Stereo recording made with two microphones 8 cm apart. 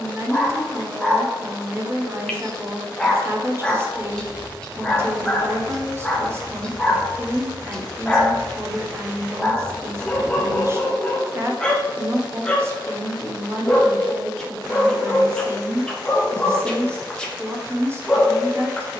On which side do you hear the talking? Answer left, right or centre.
right.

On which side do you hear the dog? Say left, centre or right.
centre.